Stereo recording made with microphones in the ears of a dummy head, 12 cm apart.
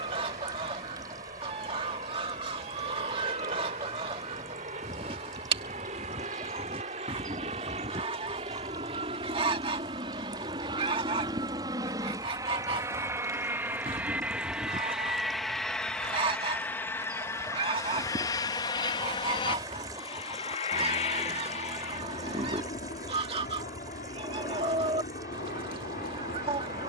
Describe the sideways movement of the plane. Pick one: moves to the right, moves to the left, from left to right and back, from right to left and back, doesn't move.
moves to the left.